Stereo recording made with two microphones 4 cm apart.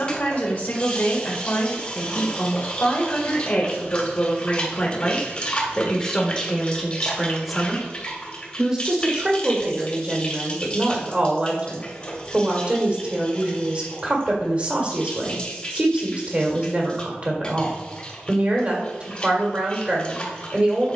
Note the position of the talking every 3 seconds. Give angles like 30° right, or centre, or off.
40° left, 30° left, centre, 30° right, 30° right, 30° right, 30° right.